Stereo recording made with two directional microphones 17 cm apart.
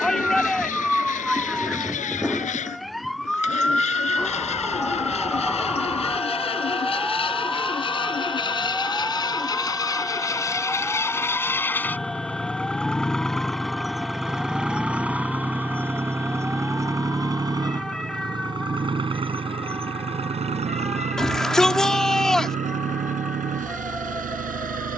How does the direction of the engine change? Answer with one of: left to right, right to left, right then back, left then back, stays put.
left to right.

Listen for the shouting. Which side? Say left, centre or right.
centre.